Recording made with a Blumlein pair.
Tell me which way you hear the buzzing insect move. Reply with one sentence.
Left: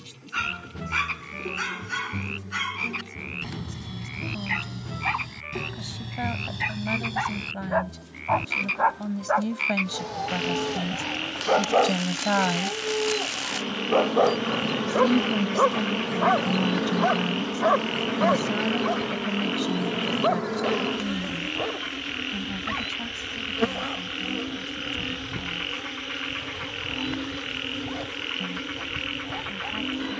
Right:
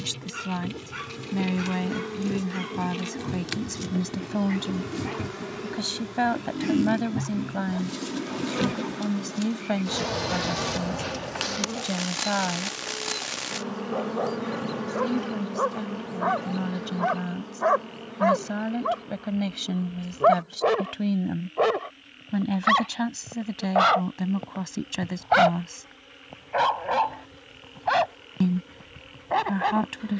In this clip you hear the buzzing insect go from the right side to the left.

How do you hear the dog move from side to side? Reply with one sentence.
You can hear the dog travel towards the right.